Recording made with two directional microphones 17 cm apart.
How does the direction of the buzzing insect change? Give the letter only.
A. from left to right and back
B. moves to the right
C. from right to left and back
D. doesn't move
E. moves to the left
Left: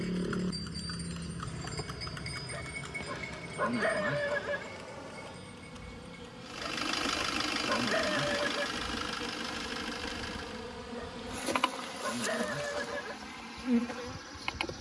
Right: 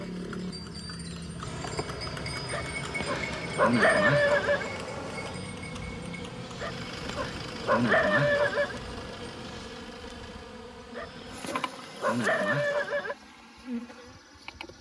E.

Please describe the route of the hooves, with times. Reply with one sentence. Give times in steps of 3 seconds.
In this clip you hear the hooves in the centre from 0 s, on the right from 3 s and not at all from 12 s.